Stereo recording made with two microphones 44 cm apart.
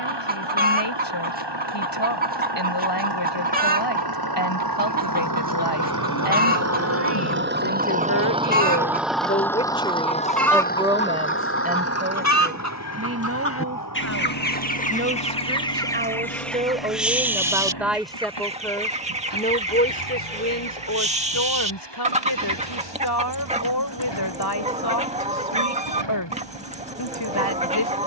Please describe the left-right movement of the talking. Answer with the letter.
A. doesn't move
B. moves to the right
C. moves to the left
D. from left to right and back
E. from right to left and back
D.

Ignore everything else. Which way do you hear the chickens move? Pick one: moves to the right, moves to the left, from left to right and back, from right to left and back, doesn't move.
from right to left and back.